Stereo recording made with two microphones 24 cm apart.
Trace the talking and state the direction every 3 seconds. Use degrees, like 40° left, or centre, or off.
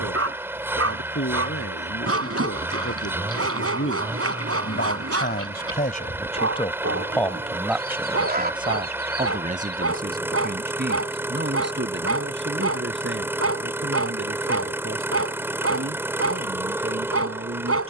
80° left, 60° left, centre, 40° right, 60° right, 60° right.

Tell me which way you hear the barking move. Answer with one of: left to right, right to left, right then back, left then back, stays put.
stays put.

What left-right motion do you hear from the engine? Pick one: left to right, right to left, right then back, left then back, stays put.
stays put.